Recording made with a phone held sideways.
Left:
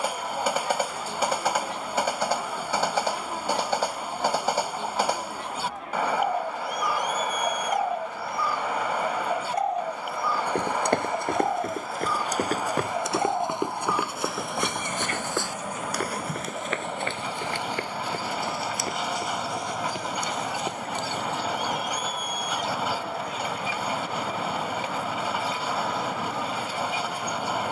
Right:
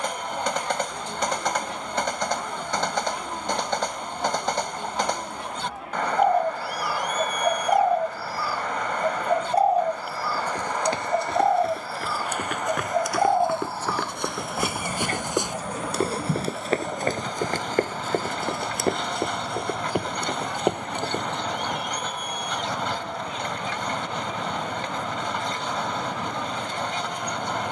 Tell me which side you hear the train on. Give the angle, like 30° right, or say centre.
10° left.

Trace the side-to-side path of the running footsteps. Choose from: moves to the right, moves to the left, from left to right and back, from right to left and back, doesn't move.
moves to the right.